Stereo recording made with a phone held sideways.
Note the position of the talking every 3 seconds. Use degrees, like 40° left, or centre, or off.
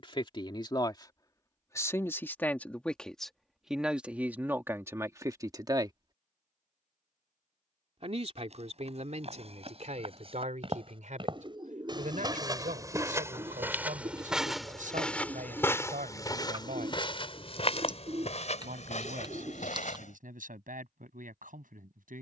20° left, 10° right, 50° right, 60° right, 70° right, 70° right, 80° right, 80° right.